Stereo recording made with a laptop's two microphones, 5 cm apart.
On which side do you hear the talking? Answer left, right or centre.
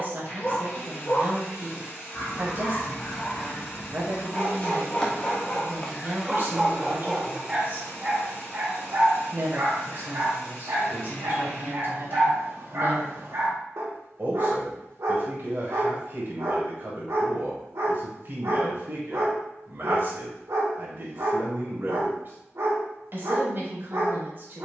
right.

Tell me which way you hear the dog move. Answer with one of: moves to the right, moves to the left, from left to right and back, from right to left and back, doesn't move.
moves to the right.